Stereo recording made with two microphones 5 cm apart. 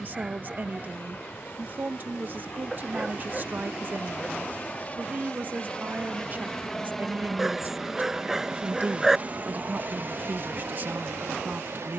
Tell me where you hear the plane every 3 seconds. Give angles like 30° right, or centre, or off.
50° left, 40° left, centre, 50° right.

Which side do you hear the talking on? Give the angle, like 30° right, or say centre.
40° right.